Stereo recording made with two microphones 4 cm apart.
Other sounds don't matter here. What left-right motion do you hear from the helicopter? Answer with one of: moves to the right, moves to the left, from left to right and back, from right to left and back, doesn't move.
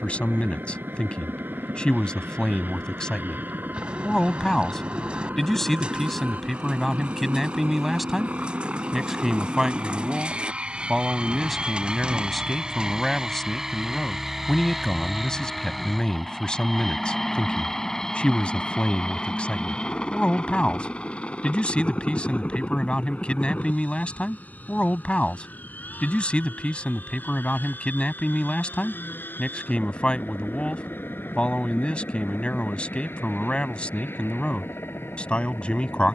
moves to the left.